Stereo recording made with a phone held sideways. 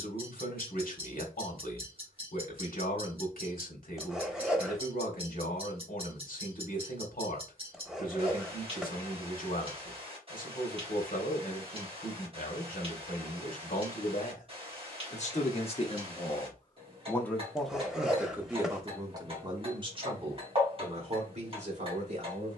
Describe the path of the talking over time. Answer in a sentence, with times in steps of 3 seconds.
In this clip you hear the talking on the left from 0 s and on the right from 18 s.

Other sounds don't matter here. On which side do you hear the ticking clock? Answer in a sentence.
In this clip you hear the ticking clock on the right.